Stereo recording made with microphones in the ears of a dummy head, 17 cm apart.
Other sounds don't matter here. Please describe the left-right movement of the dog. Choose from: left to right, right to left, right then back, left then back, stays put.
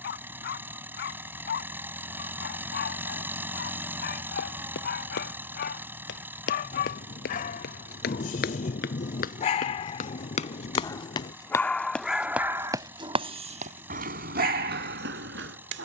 left to right.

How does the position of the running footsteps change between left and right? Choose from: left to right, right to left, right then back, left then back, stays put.
left to right.